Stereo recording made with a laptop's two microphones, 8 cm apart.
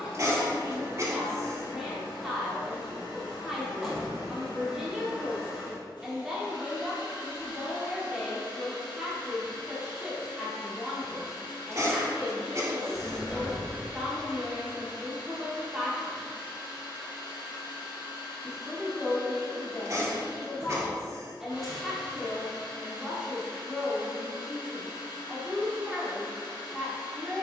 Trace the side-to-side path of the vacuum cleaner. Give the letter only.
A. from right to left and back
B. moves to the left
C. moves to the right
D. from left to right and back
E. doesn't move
E.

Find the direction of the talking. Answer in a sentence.
In this clip you hear the talking in the centre.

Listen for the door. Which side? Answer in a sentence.
In this clip you hear the door in the centre.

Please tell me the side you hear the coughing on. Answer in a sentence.
You can hear the coughing on the right.